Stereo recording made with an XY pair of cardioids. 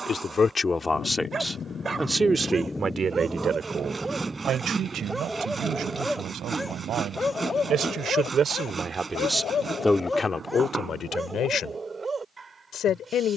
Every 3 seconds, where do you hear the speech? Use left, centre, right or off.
centre, right, right, left, left.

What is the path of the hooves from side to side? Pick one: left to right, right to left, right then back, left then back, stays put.
left to right.